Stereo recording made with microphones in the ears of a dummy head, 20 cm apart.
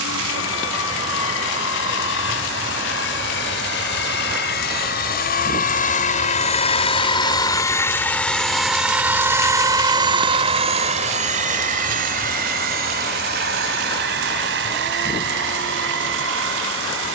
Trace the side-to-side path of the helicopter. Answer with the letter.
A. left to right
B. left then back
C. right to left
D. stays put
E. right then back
A.